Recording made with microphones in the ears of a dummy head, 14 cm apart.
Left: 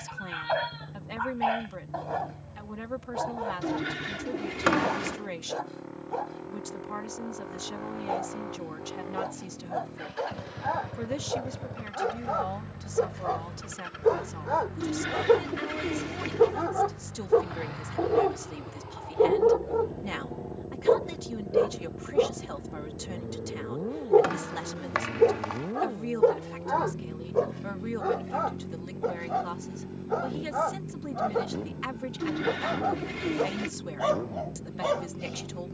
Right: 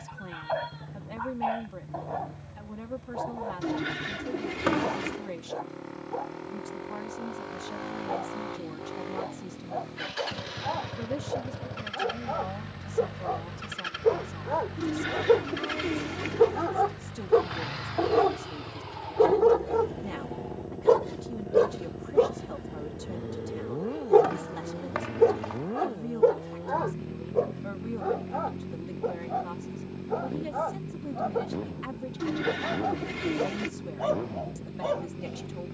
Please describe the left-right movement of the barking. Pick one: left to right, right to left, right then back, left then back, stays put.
right then back.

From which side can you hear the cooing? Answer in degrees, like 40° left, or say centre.
centre.